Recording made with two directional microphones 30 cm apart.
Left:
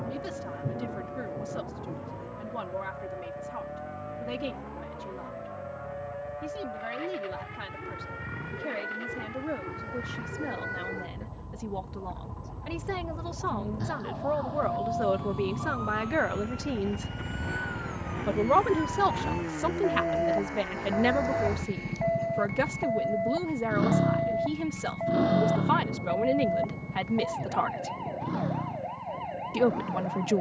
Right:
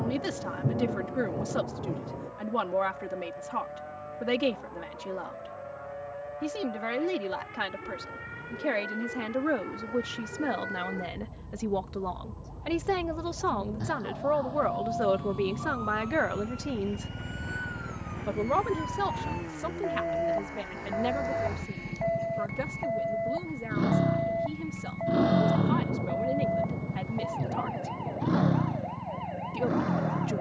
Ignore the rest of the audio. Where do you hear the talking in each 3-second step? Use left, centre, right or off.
right, right, right, right, right, centre, left, left, left, left.